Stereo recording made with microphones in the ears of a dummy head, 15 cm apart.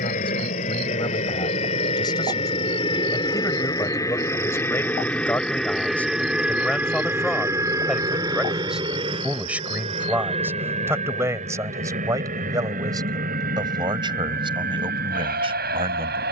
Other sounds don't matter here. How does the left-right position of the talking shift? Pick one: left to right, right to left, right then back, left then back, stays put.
left to right.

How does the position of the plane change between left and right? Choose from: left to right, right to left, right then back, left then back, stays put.
left to right.